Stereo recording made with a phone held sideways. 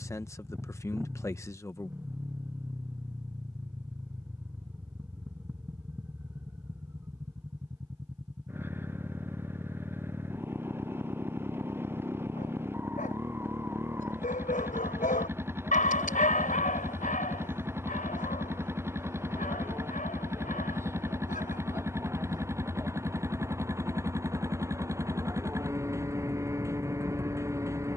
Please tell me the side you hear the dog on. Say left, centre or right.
left.